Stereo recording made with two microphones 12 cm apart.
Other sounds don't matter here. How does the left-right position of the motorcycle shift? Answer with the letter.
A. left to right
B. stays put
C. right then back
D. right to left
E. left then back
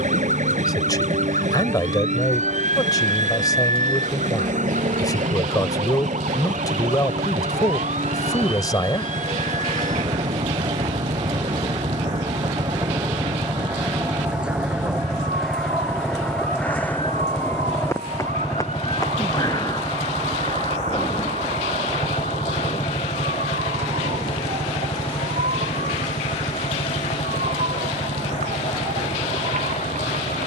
D.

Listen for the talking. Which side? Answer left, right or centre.
left.